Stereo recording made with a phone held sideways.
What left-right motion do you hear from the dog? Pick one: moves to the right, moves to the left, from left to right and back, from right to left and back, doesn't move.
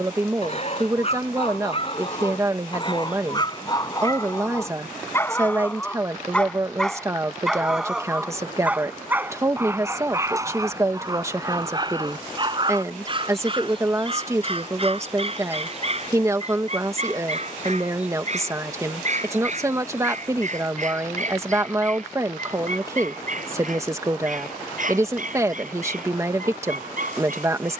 moves to the right.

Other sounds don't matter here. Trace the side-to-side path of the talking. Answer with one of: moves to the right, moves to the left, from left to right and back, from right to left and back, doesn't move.
doesn't move.